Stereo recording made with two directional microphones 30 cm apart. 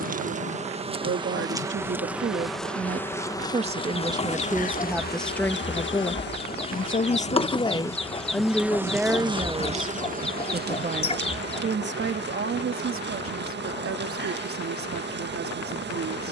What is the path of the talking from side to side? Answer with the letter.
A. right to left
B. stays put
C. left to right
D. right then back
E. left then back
E.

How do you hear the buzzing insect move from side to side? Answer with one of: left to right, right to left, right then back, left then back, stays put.
left then back.